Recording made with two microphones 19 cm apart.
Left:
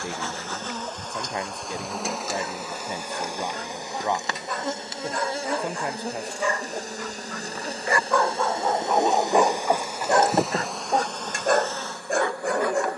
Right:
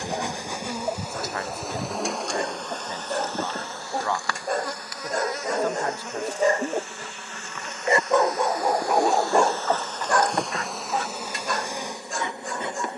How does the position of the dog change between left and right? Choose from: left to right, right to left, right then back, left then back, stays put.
right to left.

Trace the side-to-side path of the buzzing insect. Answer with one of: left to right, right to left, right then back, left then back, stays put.
left then back.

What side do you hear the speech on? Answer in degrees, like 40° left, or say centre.
20° left.